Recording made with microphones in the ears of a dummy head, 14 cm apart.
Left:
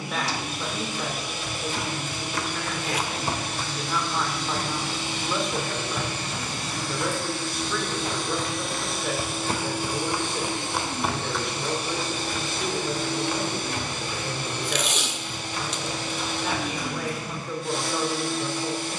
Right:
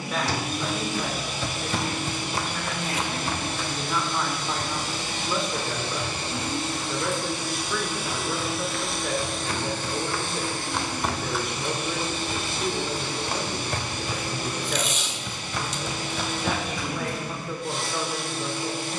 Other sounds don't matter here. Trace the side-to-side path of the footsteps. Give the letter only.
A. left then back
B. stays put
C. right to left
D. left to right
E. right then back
A.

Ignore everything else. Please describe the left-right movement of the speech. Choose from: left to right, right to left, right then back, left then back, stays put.
stays put.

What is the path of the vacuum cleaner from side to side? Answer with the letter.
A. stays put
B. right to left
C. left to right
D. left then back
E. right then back
B.